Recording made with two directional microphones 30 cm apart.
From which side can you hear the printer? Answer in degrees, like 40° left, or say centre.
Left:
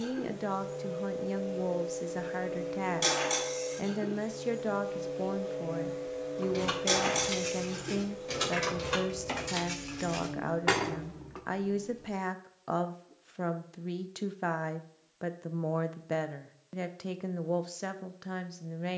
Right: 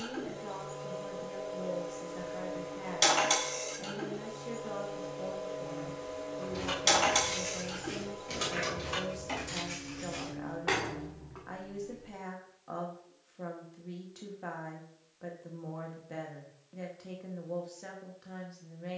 50° right.